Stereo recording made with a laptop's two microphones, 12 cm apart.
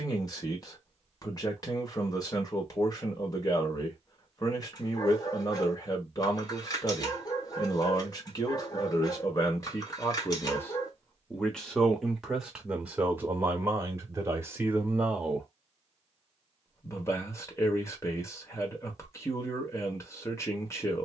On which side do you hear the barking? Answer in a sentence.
You can hear the barking on the left.